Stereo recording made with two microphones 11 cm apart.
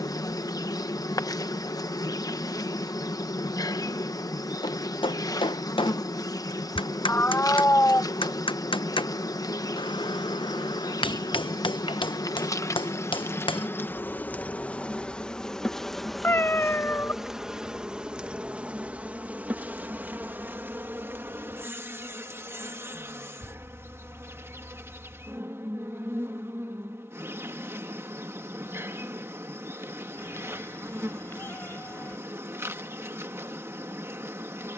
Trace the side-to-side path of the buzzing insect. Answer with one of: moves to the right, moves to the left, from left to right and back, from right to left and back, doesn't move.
moves to the right.